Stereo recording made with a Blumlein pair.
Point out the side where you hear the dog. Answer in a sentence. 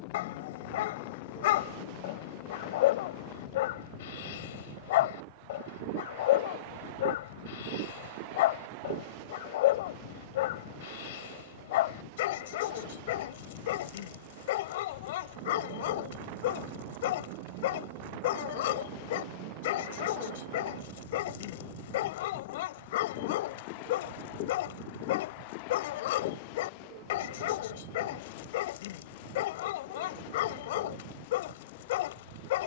In this clip you hear the dog on the left.